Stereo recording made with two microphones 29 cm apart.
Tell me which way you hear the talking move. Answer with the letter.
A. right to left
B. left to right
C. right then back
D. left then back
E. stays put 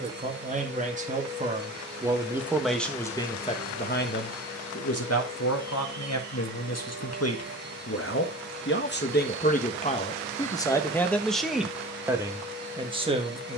D.